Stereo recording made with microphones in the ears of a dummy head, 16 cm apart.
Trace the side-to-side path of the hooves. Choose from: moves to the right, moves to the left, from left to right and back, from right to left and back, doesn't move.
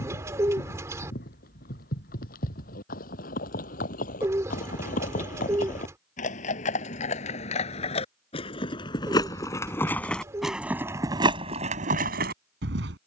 moves to the right.